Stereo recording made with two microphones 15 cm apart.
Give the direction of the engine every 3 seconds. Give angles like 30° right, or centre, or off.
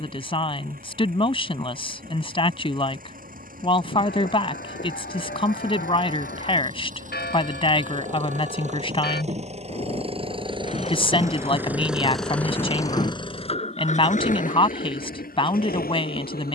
70° right, 60° right, 50° right, 30° right, 40° left, 70° left.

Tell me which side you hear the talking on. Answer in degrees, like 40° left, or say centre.
40° left.